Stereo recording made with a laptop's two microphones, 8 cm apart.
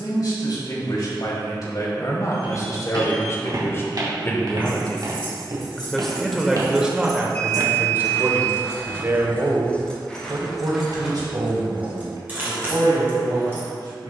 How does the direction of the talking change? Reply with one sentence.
In this clip you hear the talking move from left to right.